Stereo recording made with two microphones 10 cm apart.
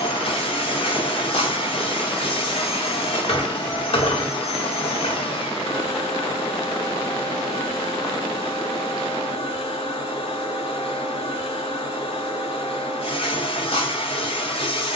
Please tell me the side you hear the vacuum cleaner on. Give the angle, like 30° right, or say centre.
70° left.